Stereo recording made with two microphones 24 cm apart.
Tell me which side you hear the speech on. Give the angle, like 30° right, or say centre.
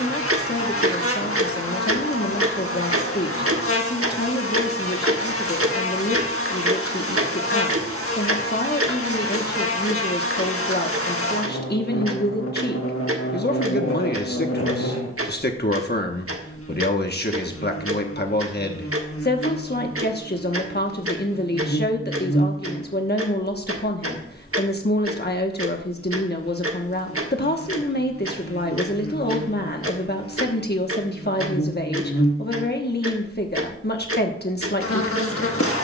40° left.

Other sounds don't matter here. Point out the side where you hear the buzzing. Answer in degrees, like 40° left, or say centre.
70° left.